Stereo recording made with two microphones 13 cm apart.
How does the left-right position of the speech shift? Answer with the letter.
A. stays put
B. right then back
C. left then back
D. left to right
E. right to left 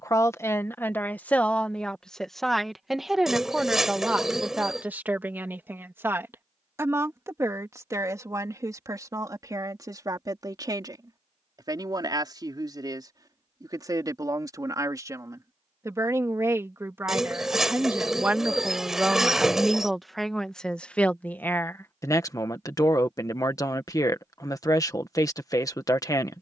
B.